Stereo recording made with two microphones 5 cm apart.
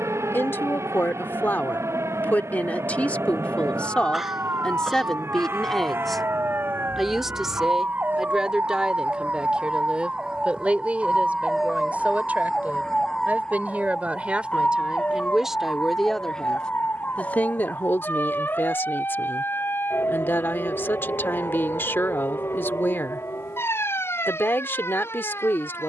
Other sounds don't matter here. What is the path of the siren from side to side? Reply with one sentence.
In this clip you hear the siren go from the right side to the left.